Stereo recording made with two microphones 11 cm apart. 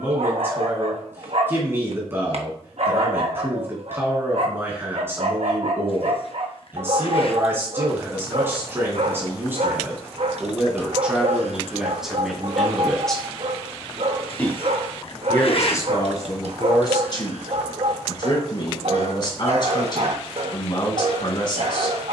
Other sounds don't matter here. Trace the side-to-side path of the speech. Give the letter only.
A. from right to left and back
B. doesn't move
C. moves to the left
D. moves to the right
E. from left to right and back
C.